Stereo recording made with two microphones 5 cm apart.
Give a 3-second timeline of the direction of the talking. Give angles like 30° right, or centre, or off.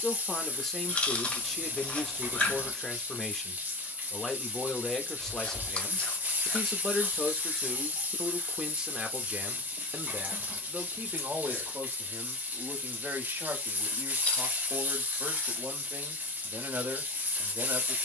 10° left, 10° left, centre, 40° right, 50° right, 50° right.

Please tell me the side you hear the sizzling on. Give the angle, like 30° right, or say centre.
40° right.